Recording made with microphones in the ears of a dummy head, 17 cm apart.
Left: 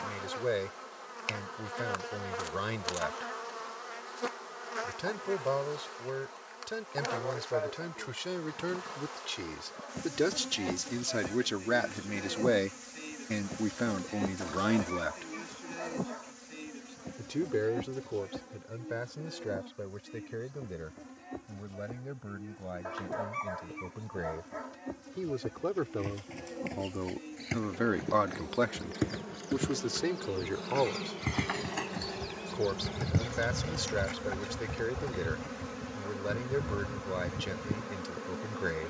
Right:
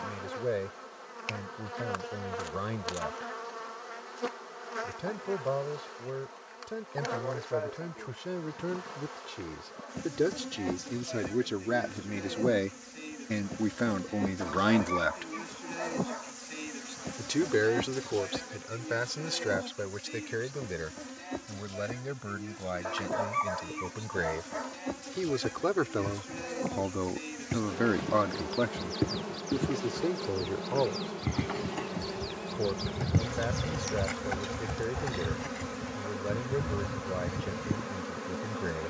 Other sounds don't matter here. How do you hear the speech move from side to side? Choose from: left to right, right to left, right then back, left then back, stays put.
right then back.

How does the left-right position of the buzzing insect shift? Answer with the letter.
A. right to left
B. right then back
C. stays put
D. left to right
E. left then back
B.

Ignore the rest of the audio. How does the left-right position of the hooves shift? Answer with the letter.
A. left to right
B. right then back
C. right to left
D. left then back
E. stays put
A.